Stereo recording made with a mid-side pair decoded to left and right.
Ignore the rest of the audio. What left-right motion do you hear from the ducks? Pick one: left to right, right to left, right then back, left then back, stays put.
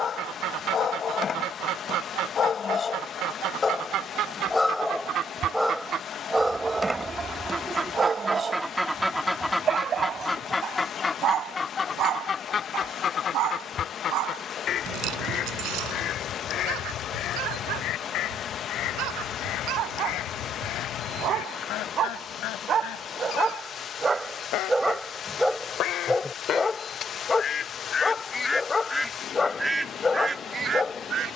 left then back.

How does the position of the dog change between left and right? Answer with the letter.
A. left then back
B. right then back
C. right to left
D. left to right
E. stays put
B.